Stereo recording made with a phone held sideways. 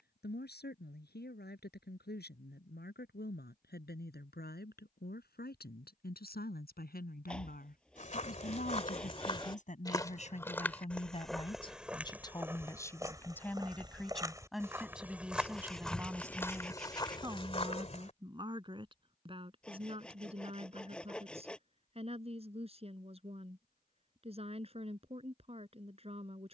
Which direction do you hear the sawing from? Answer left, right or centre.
centre.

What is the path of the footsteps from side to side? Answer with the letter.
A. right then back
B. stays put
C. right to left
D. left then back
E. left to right
A.